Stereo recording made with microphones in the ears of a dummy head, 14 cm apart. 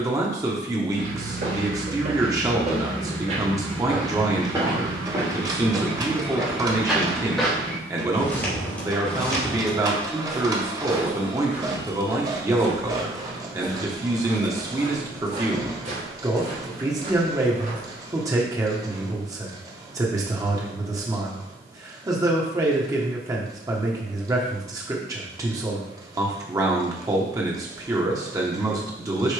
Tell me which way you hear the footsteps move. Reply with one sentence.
You can hear the footsteps go left and come back.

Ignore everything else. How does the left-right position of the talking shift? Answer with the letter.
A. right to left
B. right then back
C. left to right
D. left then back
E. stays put
E.